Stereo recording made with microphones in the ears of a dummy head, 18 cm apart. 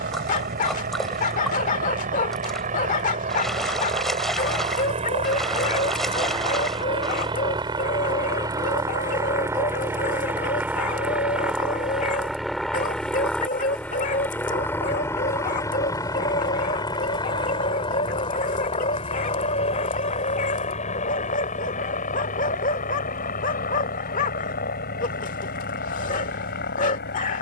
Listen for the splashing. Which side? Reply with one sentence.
In this clip you hear the splashing in the centre.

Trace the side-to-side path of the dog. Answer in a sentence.
In this clip you hear the dog stay put.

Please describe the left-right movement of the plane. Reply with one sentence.
In this clip you hear the plane move to the left.